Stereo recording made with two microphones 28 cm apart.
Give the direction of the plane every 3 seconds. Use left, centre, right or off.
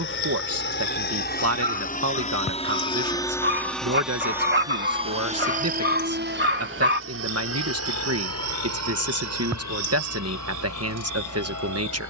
left, centre, right, right.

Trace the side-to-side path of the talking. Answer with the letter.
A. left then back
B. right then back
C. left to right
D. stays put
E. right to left
D.